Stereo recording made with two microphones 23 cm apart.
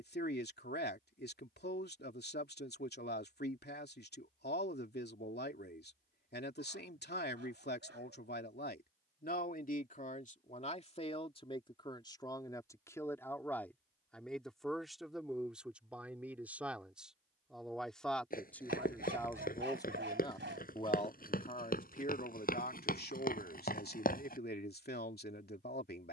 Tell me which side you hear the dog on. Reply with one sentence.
You can hear the dog on the right.